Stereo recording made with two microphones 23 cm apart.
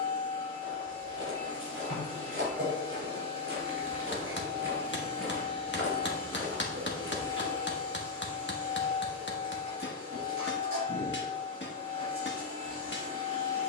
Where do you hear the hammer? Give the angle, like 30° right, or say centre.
50° left.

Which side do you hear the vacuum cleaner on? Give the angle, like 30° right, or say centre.
80° right.